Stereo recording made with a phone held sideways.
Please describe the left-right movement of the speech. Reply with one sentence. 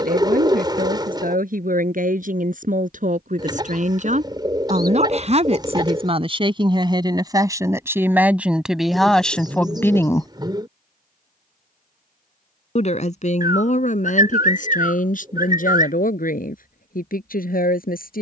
You can hear the speech move from right to left.